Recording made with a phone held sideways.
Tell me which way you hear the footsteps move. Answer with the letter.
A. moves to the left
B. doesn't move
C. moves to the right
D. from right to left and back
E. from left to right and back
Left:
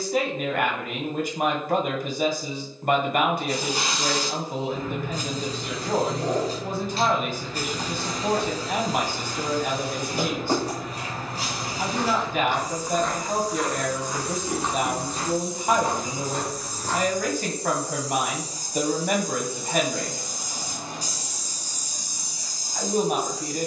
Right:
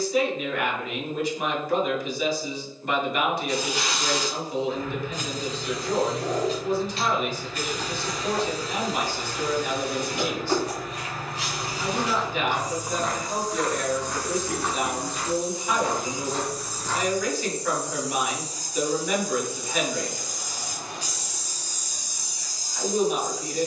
A.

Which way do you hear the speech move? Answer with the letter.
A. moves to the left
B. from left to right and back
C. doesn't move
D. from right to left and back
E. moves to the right
C.